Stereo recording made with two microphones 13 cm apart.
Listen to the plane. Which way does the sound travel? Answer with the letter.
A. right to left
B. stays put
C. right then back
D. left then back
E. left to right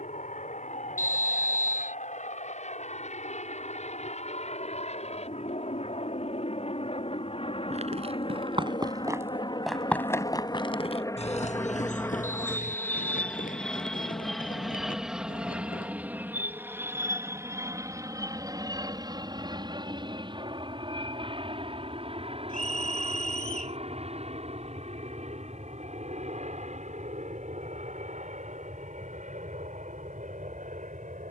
E.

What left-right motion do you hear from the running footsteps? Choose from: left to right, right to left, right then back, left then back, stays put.
right to left.